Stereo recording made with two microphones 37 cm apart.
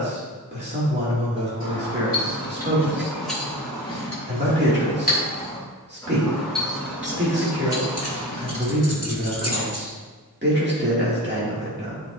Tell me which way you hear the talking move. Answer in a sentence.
In this clip you hear the talking stay in one place.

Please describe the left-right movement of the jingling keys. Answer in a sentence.
In this clip you hear the jingling keys move from right to left and back again.